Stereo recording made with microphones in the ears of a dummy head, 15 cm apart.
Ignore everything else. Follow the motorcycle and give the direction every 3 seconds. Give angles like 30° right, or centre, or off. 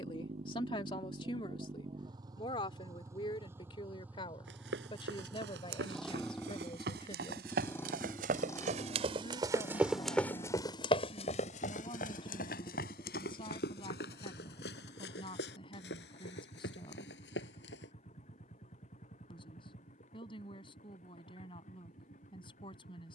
30° right, 10° right, 10° left, 30° left, 40° left, 40° left, 50° left, 50° left.